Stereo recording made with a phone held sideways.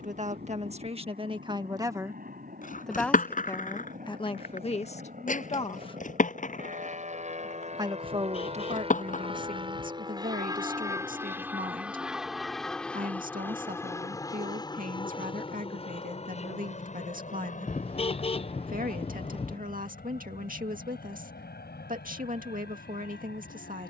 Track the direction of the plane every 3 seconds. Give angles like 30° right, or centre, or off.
70° right, 60° right, 50° right, 20° right, 10° left, 40° left, 50° left, 60° left.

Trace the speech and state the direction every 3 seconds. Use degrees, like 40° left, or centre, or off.
30° right, 30° left, 40° right, 50° right, 50° right, 50° right, 50° right, 50° right.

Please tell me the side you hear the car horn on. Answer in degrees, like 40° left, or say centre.
30° left.